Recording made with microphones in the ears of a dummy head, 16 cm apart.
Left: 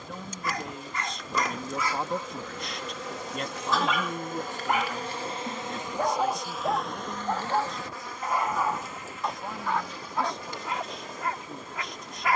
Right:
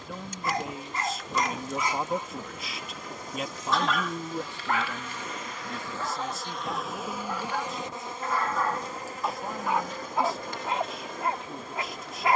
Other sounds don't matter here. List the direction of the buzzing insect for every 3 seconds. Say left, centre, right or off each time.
left, left, centre, right.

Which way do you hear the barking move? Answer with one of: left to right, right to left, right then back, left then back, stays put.
left then back.